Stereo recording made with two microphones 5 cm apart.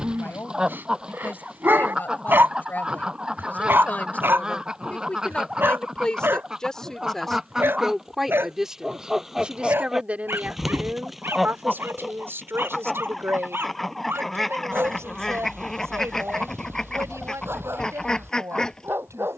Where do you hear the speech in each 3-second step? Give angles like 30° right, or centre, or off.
40° left, 30° left, centre, 30° right, 60° right, 80° right, 80° right.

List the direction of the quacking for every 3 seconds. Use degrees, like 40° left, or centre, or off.
20° right, 20° right, 10° right, 10° right, centre, 10° left, 10° left.